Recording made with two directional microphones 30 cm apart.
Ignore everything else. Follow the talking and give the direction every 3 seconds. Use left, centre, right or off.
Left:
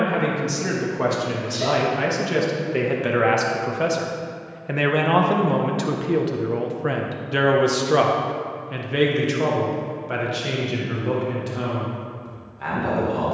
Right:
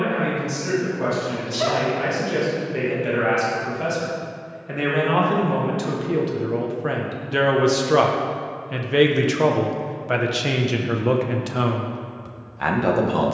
left, left, centre, right, right.